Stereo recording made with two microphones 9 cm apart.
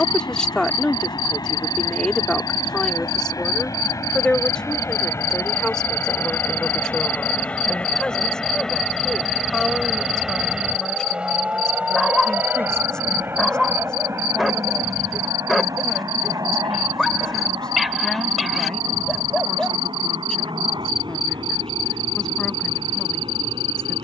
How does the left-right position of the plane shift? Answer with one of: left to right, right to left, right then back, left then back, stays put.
left to right.